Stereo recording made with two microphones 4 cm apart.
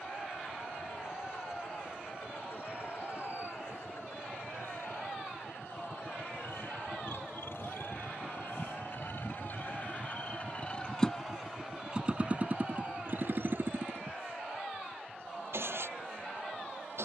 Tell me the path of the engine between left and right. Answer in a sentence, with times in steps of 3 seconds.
You can hear the engine on the left from 0 s and on the right from 12 s.